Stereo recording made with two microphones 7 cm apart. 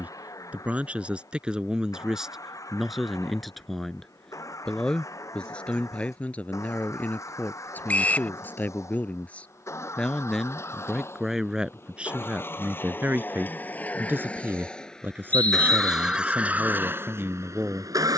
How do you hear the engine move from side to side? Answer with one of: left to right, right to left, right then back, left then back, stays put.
left to right.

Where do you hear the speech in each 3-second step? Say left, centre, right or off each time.
centre, centre, left, centre, right, right.